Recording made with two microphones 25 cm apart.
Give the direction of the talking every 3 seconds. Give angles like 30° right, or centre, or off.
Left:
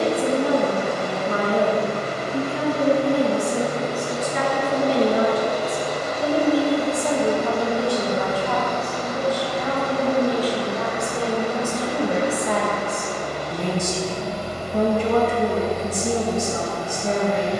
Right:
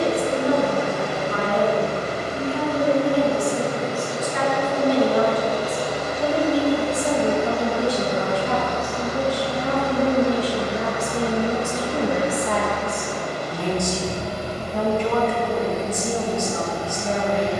50° left, 30° left, 10° right, 20° right, 10° left, 40° left.